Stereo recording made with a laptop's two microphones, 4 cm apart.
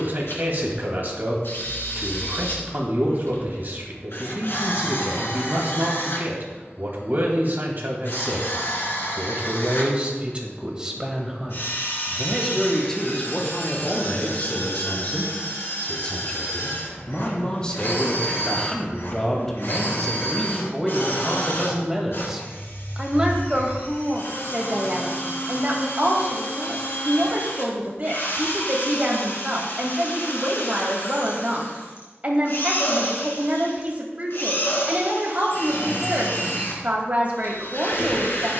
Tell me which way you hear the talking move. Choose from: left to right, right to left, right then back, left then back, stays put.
left then back.